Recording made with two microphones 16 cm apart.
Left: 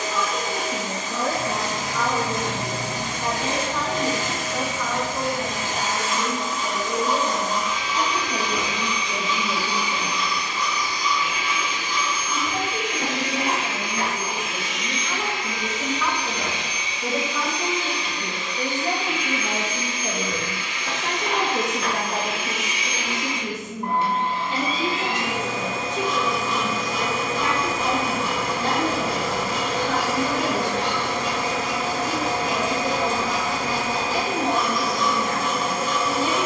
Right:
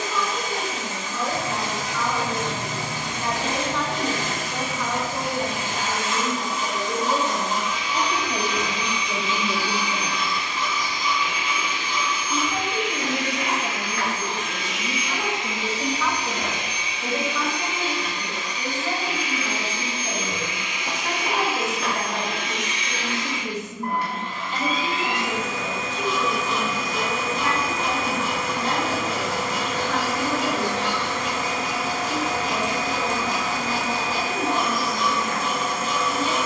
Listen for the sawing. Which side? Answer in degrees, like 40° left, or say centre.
30° right.